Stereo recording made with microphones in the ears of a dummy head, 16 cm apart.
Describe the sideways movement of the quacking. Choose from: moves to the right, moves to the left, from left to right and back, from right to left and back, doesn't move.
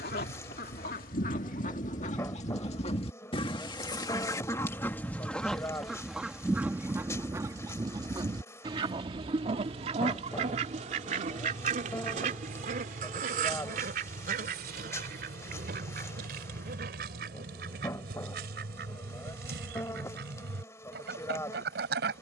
moves to the right.